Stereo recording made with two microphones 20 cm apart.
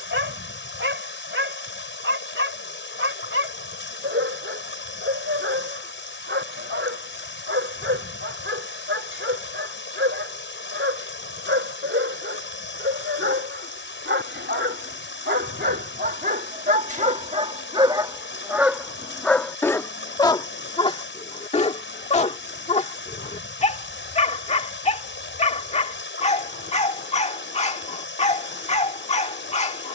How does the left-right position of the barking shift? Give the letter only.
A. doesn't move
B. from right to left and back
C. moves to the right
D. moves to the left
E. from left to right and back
D.